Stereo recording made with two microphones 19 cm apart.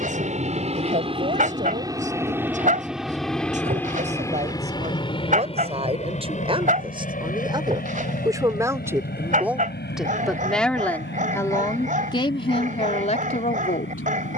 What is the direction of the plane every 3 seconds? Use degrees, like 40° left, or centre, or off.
20° right, 20° left, 40° left, 50° left, 60° left.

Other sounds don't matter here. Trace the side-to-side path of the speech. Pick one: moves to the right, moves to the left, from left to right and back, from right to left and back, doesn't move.
moves to the left.